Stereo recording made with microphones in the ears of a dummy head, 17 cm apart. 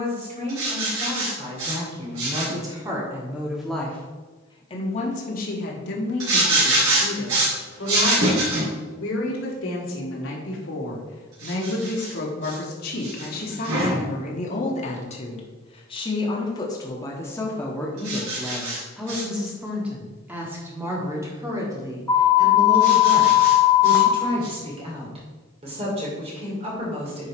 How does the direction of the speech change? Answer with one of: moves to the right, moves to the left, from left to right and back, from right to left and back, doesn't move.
from right to left and back.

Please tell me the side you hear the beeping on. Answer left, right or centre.
centre.